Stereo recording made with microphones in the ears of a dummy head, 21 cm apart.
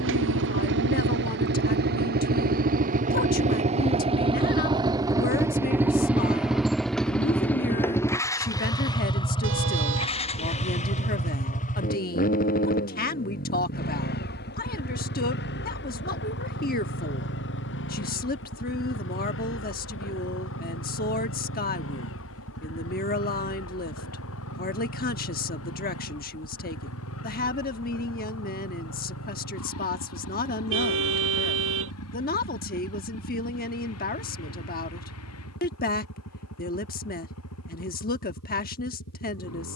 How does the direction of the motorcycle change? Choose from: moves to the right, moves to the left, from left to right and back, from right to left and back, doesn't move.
moves to the left.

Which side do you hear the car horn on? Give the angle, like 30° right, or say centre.
50° right.